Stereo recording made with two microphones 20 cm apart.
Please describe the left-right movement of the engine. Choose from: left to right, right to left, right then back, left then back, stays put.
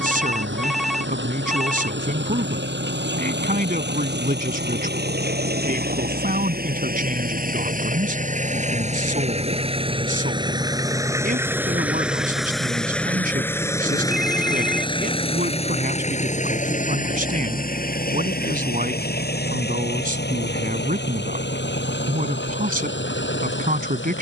right to left.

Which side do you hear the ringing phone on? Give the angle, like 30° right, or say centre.
centre.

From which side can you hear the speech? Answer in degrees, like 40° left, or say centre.
40° right.